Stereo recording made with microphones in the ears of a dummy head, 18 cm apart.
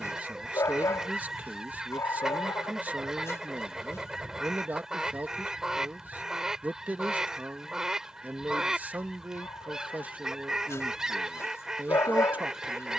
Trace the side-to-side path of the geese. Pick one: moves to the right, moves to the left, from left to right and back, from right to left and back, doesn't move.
doesn't move.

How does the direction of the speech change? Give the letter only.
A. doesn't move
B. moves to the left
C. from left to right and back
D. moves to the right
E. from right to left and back
A.